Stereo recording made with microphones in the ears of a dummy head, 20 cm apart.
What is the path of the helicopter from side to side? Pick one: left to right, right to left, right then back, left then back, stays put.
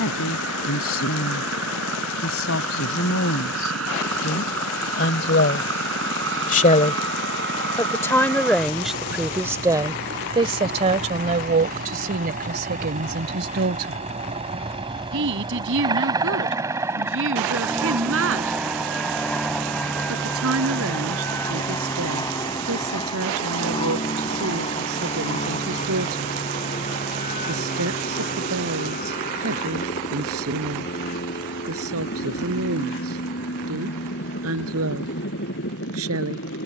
right to left.